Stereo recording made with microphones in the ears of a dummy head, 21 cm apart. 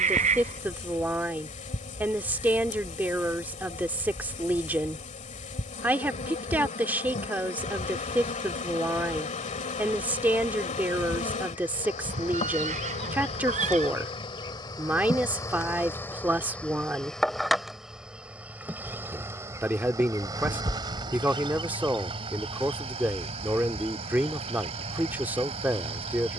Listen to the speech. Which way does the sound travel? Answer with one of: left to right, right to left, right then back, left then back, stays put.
stays put.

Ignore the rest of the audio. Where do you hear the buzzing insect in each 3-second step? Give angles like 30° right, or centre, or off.
30° left, 30° left, 30° left, 30° left, 30° left, 10° left, 10° right, 30° right, 30° right.